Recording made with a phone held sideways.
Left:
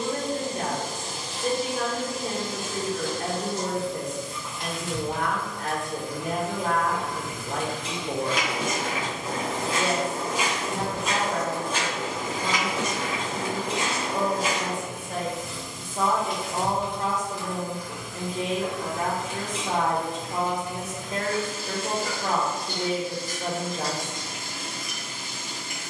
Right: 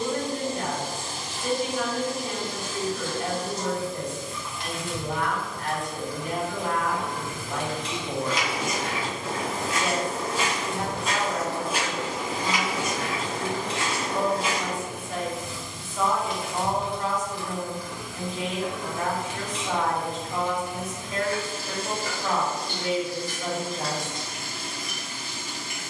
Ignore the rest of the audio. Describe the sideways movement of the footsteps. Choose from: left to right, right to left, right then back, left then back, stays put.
right then back.